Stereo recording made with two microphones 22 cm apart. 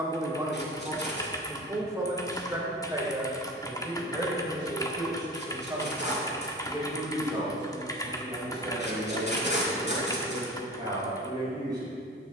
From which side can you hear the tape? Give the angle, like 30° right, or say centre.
50° left.